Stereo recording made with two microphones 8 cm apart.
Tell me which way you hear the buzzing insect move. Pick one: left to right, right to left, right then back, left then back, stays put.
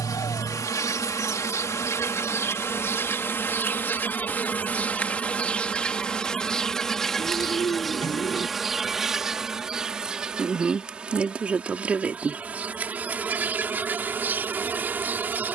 left to right.